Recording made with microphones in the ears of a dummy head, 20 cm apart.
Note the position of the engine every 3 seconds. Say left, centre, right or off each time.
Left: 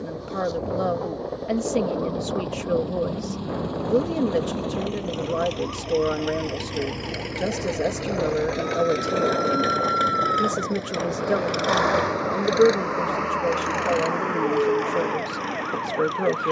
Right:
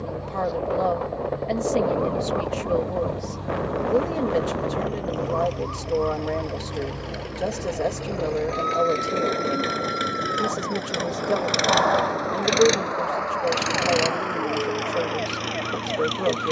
left, left, left, centre, right, right.